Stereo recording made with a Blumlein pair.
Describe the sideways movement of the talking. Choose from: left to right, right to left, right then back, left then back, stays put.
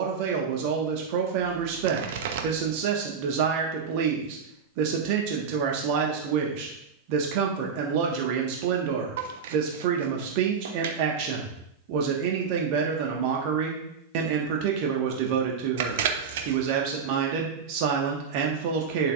stays put.